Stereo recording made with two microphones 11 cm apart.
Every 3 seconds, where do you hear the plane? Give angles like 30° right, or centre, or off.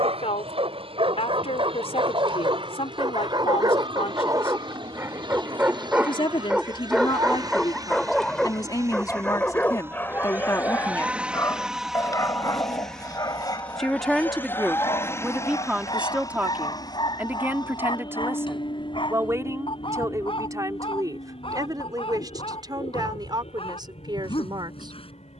60° right, 50° right, 40° right, 10° right, 10° left, 30° left, 50° left, 50° left, 60° left.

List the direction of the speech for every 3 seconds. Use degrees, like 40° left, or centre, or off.
60° left, 60° left, 40° left, 30° left, centre, 10° right, 30° right, 40° right, 40° right.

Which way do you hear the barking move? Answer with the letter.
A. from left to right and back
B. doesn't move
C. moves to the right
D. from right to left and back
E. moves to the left
E.